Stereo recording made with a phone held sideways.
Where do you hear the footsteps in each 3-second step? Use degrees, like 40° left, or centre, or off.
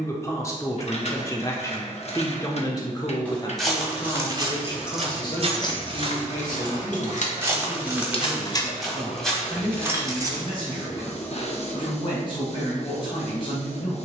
off, 30° right, 20° right, 10° left, off.